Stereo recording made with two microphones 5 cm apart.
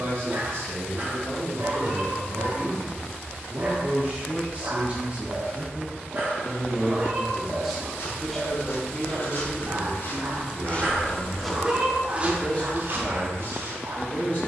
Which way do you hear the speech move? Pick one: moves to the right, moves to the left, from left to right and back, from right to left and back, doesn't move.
moves to the left.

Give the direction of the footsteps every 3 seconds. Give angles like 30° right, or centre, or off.
off, off, 70° left, 40° left, 50° right.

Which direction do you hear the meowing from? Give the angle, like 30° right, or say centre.
30° right.